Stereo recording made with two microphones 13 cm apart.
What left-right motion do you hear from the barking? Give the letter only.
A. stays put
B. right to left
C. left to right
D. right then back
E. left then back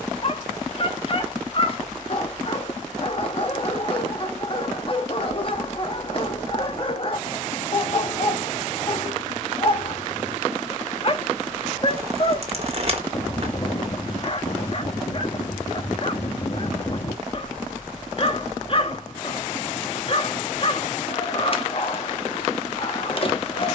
A.